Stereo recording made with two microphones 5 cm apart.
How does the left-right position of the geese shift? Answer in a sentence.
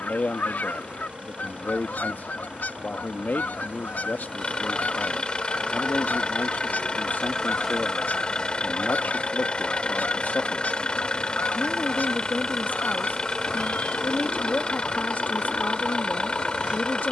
In this clip you hear the geese stay put.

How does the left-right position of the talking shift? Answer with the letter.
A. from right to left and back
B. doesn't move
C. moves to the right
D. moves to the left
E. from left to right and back
B.